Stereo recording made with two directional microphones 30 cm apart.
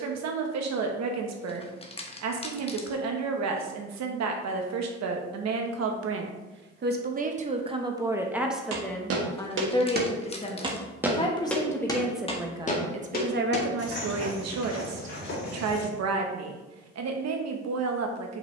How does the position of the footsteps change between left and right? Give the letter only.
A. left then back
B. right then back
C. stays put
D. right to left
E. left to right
D.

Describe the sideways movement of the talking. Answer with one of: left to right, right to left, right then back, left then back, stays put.
left then back.